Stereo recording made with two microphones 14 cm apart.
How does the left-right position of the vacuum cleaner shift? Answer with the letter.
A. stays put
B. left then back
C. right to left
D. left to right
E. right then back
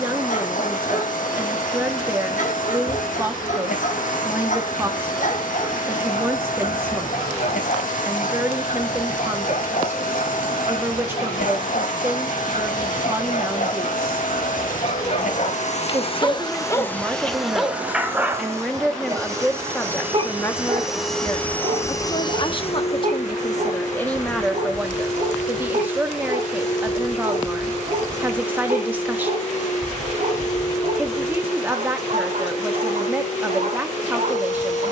E.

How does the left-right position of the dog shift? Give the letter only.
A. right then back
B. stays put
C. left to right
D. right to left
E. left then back
C.